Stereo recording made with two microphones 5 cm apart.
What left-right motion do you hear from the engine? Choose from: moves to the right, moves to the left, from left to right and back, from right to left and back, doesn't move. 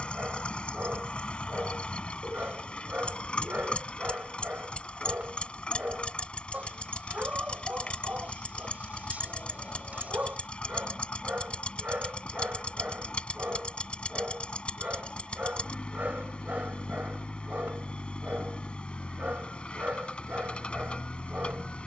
doesn't move.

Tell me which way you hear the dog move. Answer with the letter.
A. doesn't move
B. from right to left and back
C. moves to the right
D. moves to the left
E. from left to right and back
A.